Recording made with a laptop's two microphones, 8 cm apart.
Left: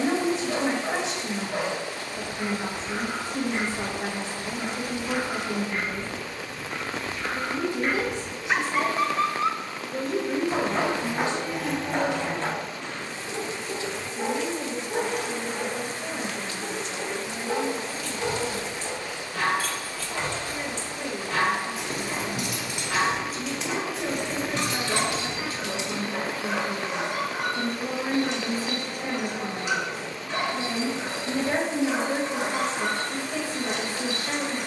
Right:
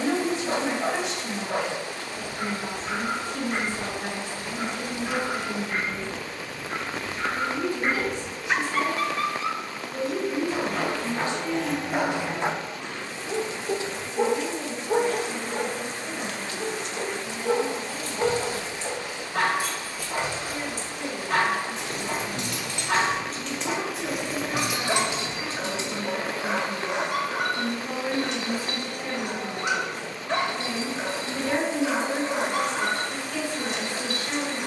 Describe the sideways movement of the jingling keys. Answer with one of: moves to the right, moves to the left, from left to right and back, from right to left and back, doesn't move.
from right to left and back.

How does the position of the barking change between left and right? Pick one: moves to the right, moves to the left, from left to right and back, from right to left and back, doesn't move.
from right to left and back.